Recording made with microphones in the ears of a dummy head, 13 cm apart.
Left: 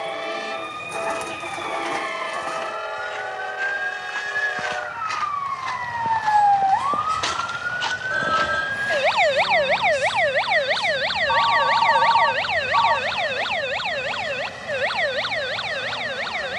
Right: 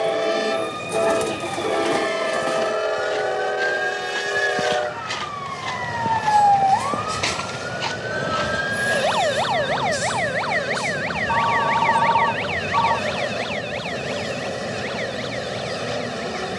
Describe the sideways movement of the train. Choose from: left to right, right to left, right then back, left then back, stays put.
stays put.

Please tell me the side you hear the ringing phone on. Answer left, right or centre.
centre.